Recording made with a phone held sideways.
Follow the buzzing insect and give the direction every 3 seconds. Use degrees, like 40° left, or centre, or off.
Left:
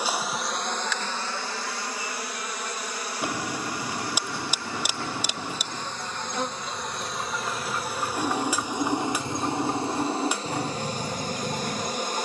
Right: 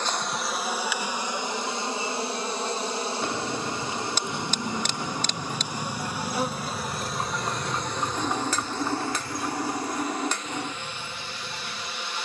20° right, 20° right, centre, 30° left.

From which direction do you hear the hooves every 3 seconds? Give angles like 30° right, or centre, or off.
off, 60° right, 30° right, 60° left.